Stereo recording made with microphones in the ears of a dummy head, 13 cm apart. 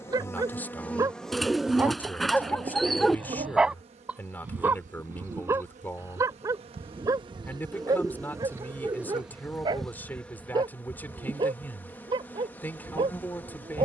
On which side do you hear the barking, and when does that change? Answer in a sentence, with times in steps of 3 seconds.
You can hear the barking in the centre from 0 s and on the right from 6 s.